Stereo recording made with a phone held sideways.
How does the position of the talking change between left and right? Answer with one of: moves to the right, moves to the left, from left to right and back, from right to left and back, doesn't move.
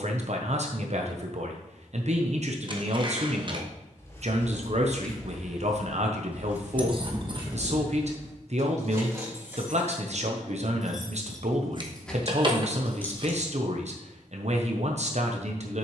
doesn't move.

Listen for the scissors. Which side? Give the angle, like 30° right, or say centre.
40° right.